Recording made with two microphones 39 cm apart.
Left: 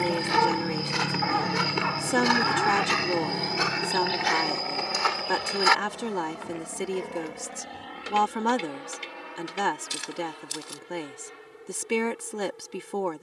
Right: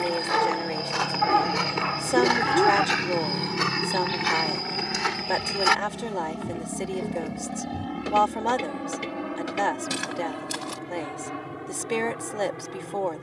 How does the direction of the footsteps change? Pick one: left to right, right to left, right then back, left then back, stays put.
left to right.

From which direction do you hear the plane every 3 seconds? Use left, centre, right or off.
centre, right, right, right, right.